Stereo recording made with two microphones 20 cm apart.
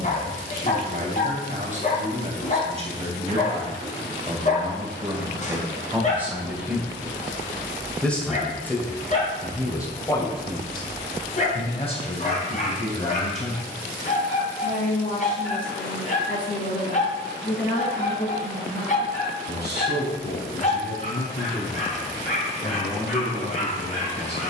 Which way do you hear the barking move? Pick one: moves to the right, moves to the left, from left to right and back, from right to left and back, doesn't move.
doesn't move.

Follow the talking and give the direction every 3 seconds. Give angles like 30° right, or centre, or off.
40° right, 20° right, centre, 20° left, 30° left, 50° left, 50° left, 60° left.